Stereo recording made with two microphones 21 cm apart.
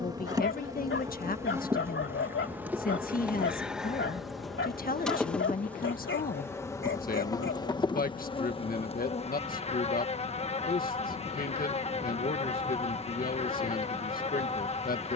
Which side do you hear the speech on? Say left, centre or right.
left.